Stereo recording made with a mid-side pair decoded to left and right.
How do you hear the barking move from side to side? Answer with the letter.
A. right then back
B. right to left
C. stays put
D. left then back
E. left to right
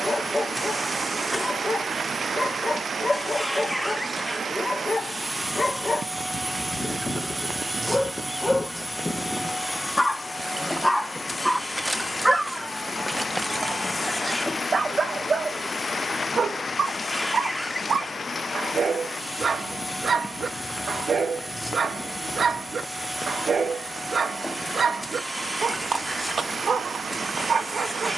E.